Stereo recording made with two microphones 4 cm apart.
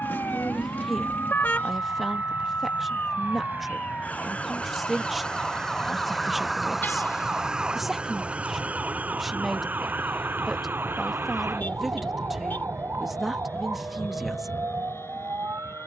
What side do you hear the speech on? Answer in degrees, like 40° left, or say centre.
centre.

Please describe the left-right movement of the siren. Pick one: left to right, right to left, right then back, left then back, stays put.
left to right.